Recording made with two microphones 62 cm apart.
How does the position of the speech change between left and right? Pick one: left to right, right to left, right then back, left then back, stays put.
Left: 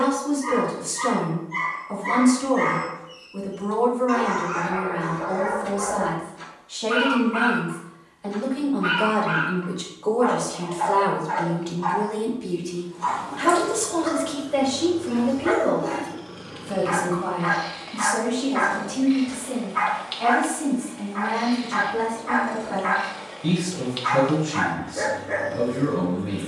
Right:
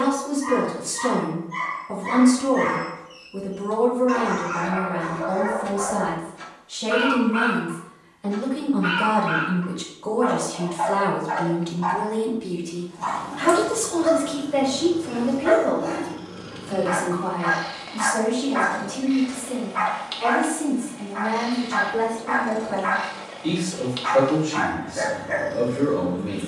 right to left.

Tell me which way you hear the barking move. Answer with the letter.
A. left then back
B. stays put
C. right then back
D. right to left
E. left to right
B.